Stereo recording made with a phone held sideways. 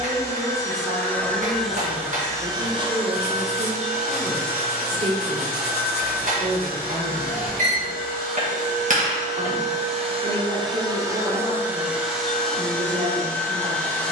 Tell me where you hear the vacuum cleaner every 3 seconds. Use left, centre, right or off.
centre, right, right, right, centre.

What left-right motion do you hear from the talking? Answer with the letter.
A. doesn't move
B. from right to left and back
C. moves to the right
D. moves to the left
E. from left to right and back
A.